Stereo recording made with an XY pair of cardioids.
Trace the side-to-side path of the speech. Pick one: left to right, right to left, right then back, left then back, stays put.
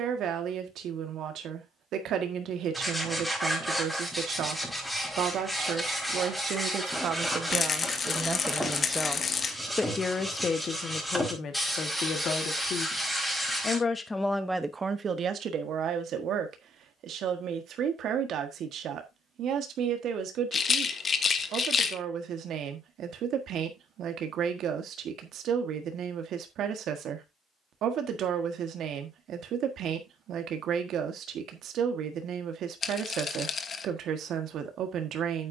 left then back.